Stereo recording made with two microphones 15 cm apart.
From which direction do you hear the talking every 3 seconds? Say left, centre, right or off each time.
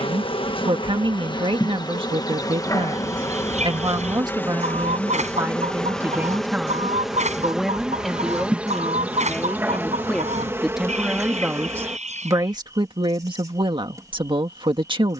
right, right, centre, centre, right.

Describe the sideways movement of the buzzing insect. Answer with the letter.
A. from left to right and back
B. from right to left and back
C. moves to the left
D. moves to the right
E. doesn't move
D.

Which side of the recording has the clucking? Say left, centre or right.
right.